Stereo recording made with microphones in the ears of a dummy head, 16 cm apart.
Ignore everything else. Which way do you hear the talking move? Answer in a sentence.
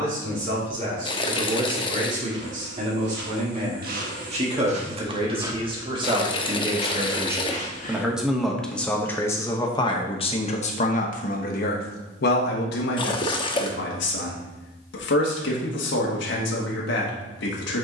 You can hear the talking move from right to left.